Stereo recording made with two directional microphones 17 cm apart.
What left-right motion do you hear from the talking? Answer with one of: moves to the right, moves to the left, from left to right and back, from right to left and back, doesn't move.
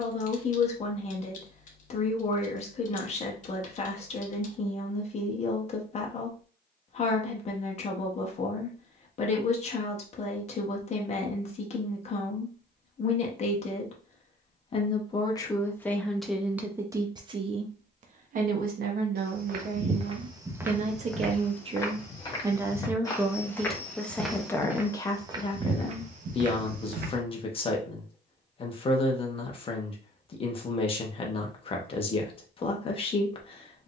from left to right and back.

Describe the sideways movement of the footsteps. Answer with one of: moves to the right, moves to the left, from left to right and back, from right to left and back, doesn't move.
from right to left and back.